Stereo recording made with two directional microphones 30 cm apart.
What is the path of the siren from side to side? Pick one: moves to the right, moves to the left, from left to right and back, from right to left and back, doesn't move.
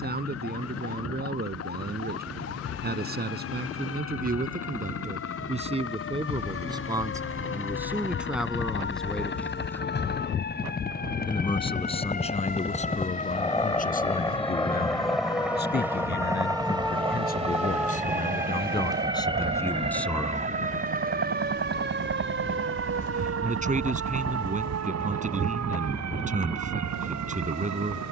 moves to the right.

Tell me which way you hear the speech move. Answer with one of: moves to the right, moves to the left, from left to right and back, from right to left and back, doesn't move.
from right to left and back.